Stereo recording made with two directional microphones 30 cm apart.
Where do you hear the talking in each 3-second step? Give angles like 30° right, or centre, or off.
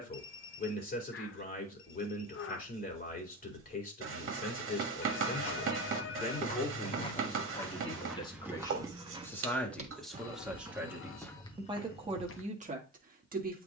30° left, 30° left, 20° left, centre, 30° right.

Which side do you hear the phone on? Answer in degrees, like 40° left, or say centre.
50° left.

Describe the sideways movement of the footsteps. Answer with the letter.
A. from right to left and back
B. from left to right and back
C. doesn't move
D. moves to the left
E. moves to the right
B.